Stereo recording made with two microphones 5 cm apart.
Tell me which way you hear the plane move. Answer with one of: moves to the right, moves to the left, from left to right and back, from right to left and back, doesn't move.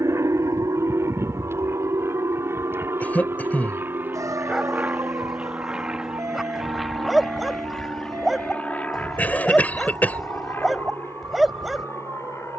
moves to the left.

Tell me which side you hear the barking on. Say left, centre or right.
centre.